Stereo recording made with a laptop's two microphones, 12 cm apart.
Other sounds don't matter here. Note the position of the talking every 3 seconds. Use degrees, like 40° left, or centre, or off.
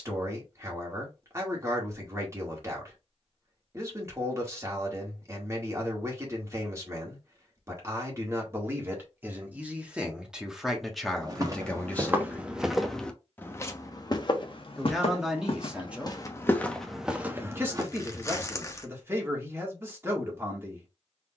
20° right, 20° right, 20° right, centre, 10° left, 10° right, 20° right.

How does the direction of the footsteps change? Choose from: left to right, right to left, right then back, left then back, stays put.
left then back.